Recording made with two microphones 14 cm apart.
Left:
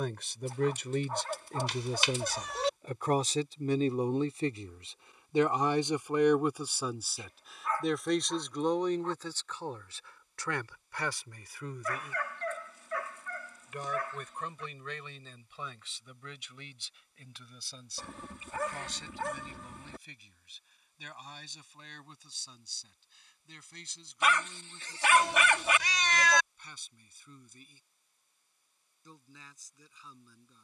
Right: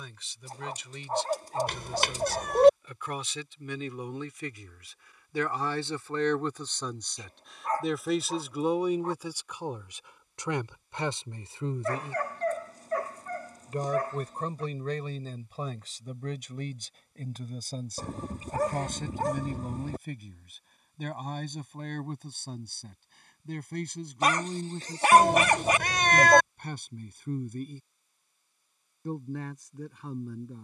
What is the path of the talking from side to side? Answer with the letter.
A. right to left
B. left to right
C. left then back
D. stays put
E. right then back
B.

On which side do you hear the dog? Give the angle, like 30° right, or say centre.
40° right.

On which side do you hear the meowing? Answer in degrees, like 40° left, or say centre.
50° right.